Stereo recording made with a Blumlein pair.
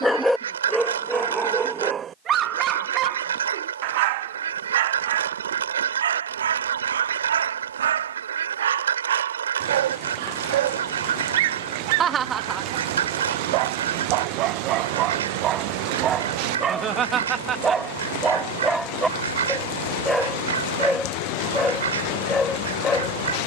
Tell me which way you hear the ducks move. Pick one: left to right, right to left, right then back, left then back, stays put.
stays put.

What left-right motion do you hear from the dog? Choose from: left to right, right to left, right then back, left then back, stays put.
right then back.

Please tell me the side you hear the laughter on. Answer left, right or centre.
right.